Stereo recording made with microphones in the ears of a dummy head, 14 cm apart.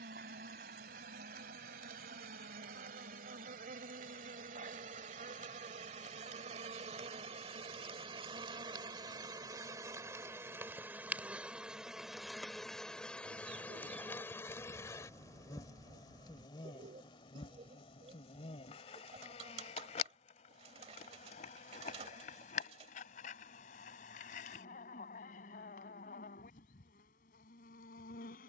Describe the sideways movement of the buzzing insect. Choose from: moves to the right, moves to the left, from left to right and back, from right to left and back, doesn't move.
moves to the left.